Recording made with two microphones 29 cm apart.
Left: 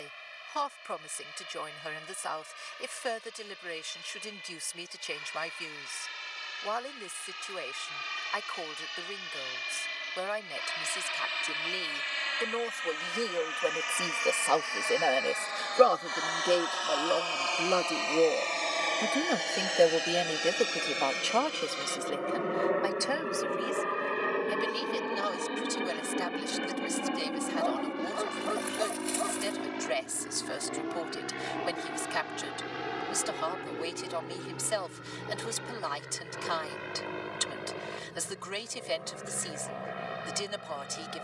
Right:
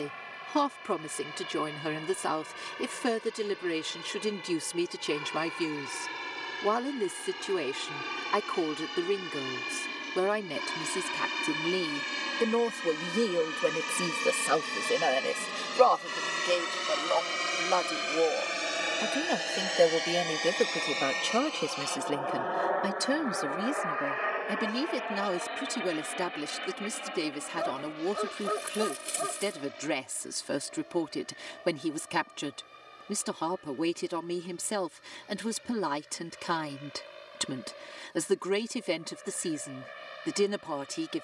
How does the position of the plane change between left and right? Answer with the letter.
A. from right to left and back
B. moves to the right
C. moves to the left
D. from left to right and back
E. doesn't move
C.